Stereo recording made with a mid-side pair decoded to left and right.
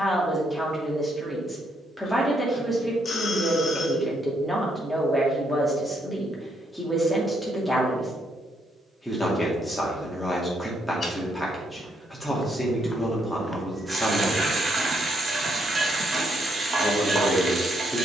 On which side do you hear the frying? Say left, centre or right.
right.